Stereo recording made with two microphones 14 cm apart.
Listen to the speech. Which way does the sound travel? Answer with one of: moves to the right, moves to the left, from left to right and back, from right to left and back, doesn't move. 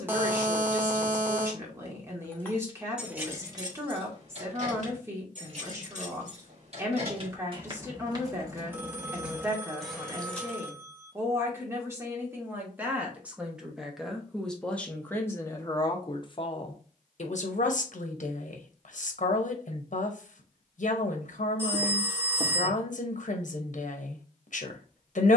moves to the left.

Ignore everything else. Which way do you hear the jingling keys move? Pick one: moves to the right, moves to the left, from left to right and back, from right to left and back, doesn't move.
from left to right and back.